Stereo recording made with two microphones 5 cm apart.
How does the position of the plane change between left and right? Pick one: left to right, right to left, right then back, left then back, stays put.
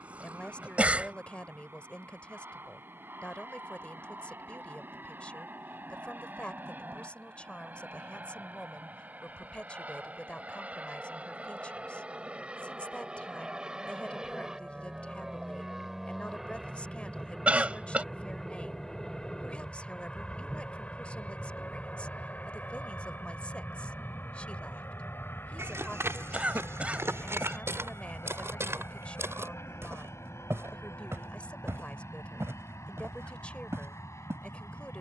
right to left.